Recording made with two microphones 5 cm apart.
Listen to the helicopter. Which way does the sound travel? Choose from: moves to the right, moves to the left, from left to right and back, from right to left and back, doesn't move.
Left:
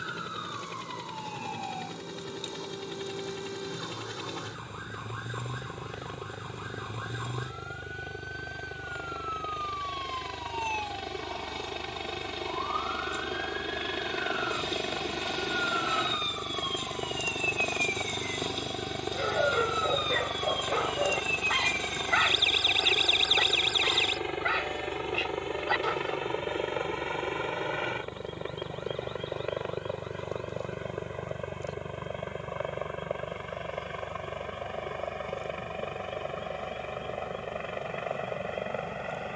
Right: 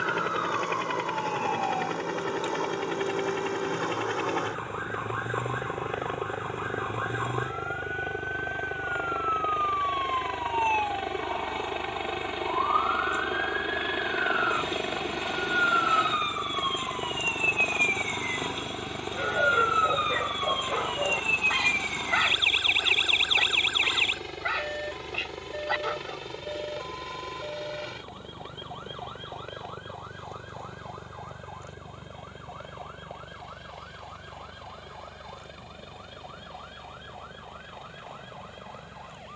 moves to the left.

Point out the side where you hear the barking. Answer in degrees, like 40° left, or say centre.
centre.